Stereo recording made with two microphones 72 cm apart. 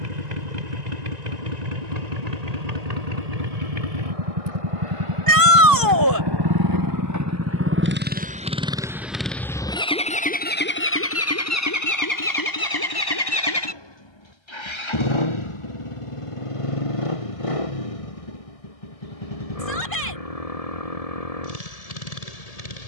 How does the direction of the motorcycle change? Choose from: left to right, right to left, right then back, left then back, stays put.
right to left.